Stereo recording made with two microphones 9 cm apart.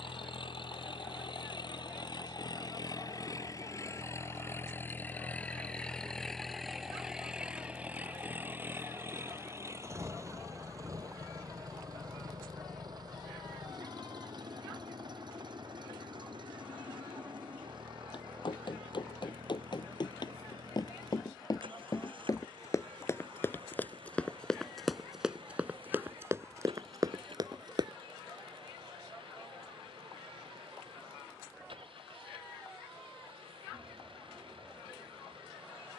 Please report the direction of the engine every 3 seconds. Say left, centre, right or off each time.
left, left, centre, right, right, right, right, right, right, right, right, right.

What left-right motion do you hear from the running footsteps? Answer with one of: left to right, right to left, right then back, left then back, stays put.
left to right.